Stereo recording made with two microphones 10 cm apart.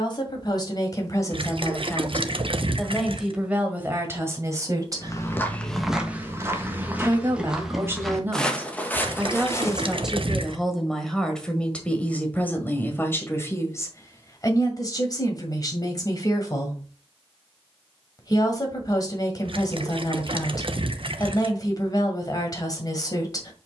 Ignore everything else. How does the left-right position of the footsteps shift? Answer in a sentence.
You can hear the footsteps move from left to right and back again.